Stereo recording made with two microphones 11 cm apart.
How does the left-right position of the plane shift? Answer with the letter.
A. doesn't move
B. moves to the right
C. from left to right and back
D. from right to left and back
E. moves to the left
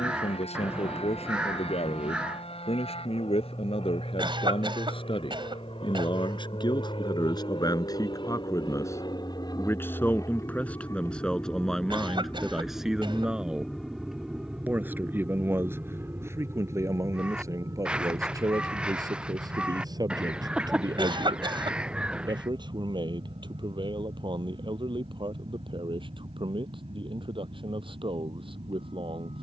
B.